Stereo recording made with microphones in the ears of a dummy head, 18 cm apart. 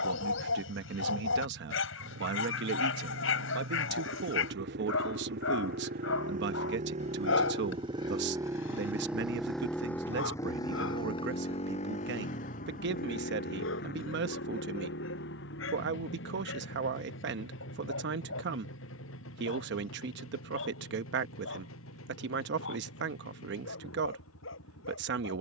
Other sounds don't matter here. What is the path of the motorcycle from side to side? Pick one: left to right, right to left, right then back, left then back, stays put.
right to left.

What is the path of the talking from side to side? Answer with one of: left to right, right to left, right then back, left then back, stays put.
stays put.